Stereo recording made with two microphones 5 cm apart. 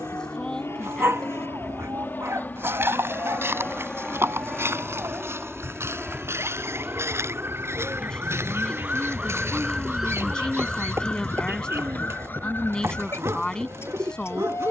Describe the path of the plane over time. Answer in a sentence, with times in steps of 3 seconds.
You can hear the plane on the left from 0 s, in the centre from 3 s and on the right from 6 s.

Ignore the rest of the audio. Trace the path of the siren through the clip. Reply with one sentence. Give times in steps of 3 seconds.
In this clip you hear the siren on the right from 0 s, in the centre from 9 s and on the left from 12 s.